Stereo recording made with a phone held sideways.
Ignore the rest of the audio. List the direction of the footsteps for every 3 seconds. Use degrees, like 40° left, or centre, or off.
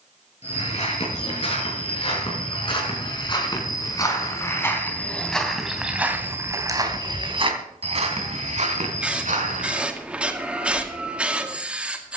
40° left, 20° left, 40° right, 70° right.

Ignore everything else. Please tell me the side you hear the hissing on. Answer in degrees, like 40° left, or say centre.
10° right.